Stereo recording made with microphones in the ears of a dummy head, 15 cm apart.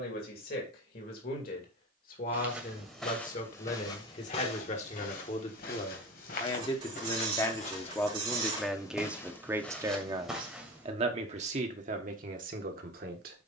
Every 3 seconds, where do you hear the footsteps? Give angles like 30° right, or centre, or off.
10° right, 40° left, 40° left, centre, off.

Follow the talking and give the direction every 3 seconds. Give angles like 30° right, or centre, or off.
60° left, 50° left, 20° left, 30° right, 60° right.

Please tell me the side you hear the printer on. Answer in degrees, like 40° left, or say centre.
30° right.